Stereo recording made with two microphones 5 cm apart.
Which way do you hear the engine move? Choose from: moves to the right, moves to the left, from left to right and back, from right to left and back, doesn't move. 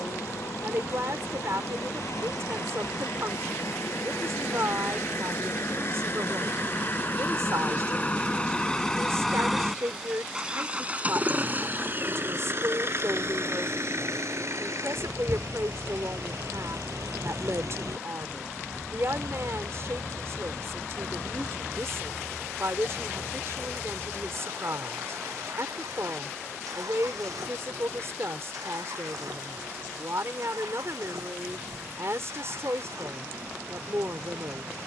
moves to the right.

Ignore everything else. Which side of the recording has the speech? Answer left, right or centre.
right.